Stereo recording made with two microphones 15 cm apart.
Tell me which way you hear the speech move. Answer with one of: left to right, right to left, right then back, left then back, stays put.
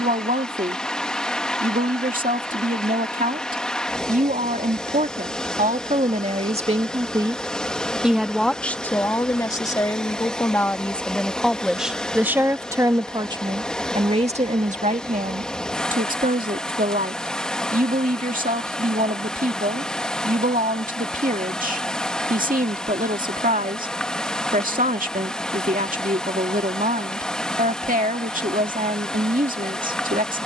left then back.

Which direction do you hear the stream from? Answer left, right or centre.
centre.